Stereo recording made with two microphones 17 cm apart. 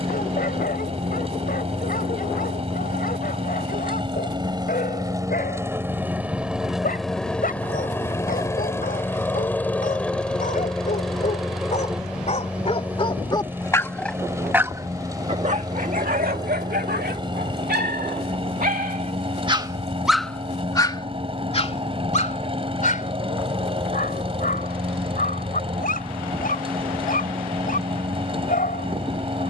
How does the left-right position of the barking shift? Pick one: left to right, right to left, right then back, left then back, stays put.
right then back.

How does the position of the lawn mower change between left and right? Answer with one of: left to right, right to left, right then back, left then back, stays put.
left then back.